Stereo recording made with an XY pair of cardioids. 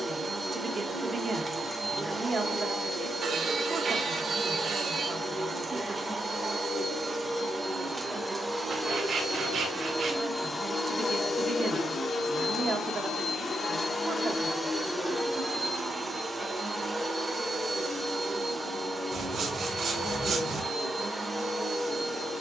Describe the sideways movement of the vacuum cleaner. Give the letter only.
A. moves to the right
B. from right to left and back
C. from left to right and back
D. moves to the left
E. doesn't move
B.